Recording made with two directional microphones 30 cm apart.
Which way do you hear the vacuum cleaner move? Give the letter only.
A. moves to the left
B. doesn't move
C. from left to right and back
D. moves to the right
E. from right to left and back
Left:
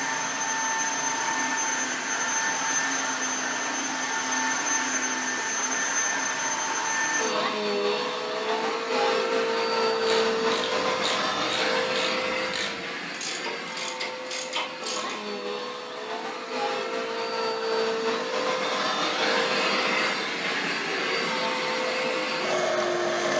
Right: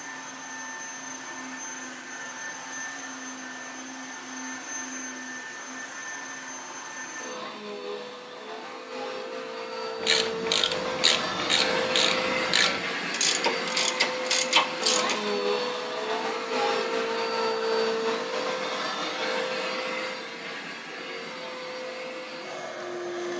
C.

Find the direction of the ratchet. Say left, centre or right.
right.